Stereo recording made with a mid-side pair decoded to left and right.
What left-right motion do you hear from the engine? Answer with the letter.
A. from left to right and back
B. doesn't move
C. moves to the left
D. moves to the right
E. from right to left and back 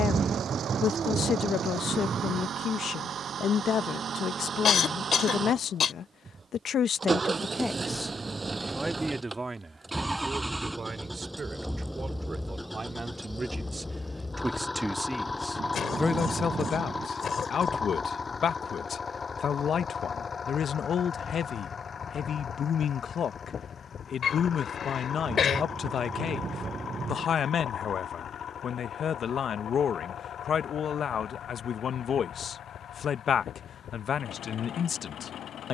C.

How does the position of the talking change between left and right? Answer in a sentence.
In this clip you hear the talking go right and come back.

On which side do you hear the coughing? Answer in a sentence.
In this clip you hear the coughing on the left.